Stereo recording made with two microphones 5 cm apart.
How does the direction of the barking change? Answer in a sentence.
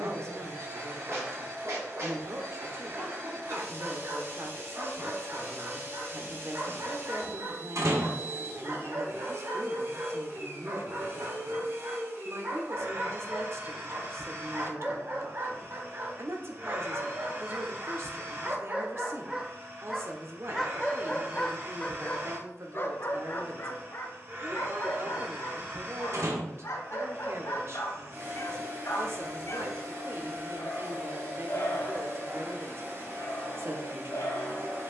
In this clip you hear the barking go from the right side to the left.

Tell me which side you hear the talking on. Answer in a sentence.
You can hear the talking on the right.